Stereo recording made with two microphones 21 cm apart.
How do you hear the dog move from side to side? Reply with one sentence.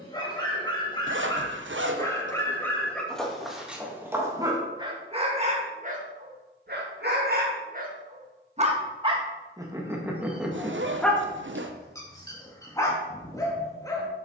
In this clip you hear the dog go right and come back.